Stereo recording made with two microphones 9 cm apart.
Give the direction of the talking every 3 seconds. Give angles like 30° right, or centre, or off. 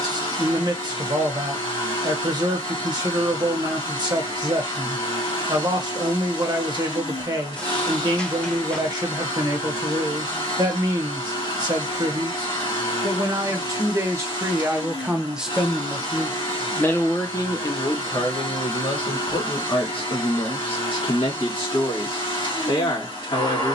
40° right, 40° right, 40° right, 40° right, 30° right, 20° left, 60° left, 70° left.